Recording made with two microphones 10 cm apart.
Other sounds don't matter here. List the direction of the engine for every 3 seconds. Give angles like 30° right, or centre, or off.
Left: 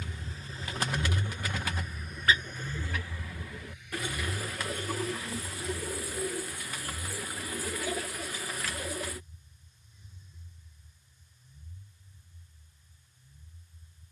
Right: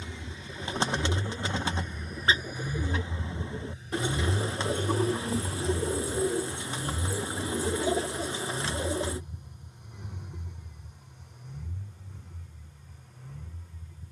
10° left, 40° right, 60° right, 70° right, 70° right.